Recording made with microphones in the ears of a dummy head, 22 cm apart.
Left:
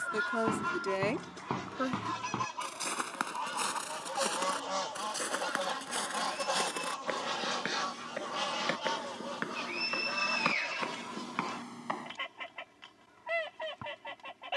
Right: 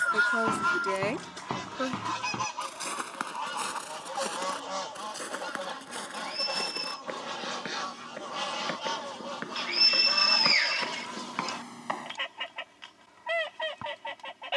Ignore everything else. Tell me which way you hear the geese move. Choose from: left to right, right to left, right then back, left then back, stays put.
left then back.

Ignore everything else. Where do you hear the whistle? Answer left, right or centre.
right.